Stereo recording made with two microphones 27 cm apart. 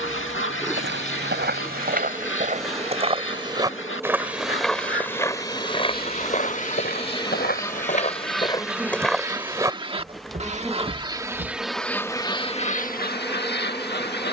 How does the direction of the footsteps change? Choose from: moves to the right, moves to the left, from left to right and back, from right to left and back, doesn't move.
from right to left and back.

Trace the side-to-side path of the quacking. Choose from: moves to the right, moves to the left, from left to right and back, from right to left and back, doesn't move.
from left to right and back.